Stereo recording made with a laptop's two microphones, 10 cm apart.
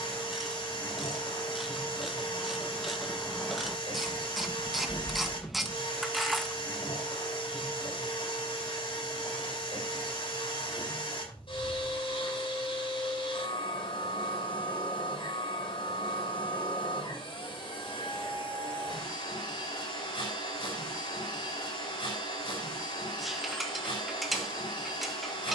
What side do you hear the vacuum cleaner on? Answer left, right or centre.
left.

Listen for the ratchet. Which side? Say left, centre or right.
centre.